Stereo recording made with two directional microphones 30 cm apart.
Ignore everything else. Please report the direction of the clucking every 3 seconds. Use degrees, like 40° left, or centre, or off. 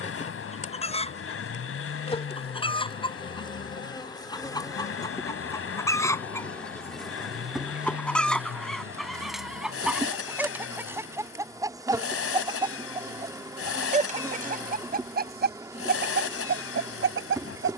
20° left, 10° left, centre, 10° right, 20° right, 40° right.